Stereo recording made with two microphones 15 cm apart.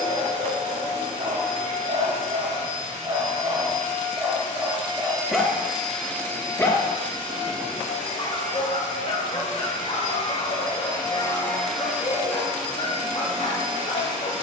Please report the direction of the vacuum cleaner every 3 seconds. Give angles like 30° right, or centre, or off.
50° right, 30° right, 40° left, 40° left, 40° right.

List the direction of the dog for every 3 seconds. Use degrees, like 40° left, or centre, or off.
60° right, 20° right, 30° left, 50° left, 50° left.